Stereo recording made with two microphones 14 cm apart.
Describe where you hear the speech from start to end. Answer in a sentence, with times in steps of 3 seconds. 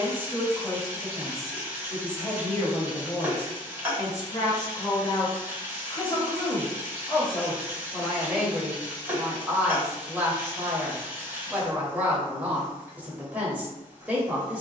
In this clip you hear the speech in the centre from 0 s, on the left from 3 s and in the centre from 6 s.